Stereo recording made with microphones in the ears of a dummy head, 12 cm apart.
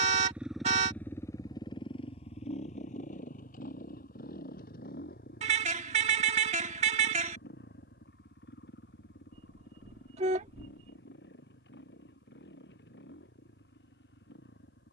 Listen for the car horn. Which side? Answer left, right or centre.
right.